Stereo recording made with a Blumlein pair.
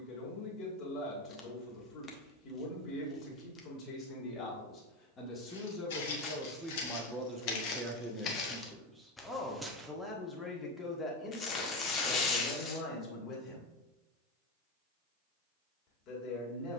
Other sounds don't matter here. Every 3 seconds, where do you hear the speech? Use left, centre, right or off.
left, left, centre, centre, left, left.